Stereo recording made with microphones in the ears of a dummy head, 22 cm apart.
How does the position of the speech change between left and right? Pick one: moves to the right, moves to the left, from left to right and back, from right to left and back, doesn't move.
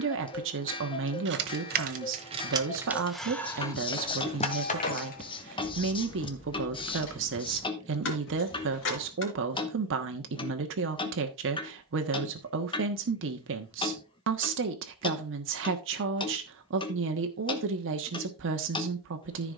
doesn't move.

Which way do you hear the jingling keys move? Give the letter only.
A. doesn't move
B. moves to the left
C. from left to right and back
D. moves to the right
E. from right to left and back
B.